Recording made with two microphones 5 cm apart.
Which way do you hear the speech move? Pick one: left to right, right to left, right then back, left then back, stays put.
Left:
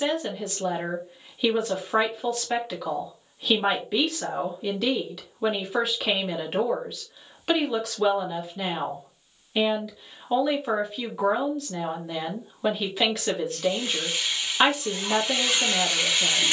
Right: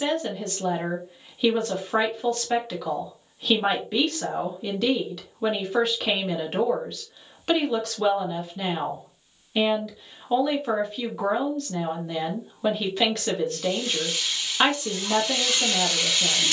stays put.